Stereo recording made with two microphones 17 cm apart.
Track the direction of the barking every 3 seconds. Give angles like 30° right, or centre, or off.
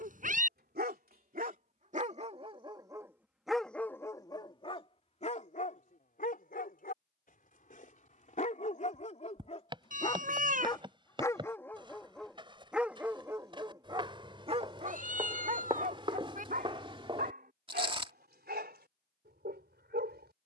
40° right, 20° left, 50° left, 20° left, 20° right, 50° right, 70° right.